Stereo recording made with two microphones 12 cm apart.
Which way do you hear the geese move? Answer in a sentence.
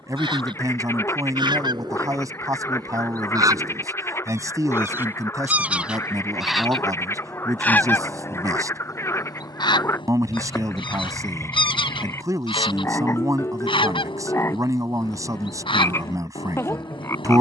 In this clip you hear the geese move to the left.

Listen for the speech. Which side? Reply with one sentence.
You can hear the speech on the right.